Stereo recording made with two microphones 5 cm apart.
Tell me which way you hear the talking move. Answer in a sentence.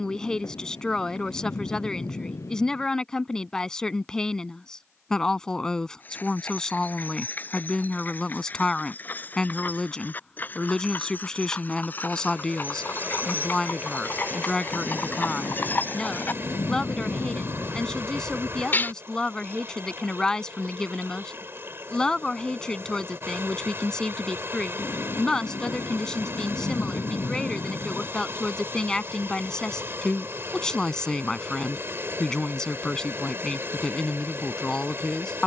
You can hear the talking stay put.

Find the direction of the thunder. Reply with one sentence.
You can hear the thunder on the left.